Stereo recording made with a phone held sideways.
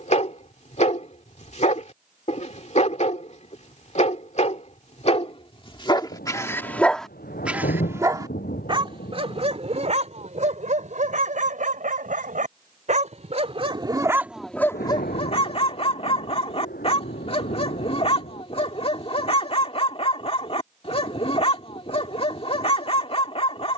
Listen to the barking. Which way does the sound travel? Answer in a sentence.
In this clip you hear the barking move from left to right and back again.